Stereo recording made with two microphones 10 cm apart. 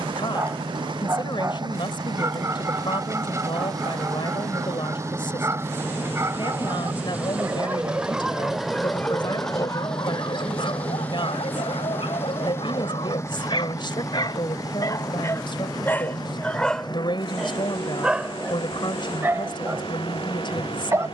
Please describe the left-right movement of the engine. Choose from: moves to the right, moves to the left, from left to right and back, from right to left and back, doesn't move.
moves to the left.